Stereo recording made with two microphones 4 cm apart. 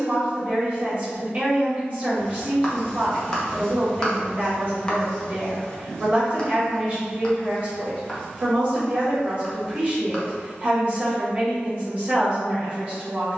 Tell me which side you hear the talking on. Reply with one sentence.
You can hear the talking on the right.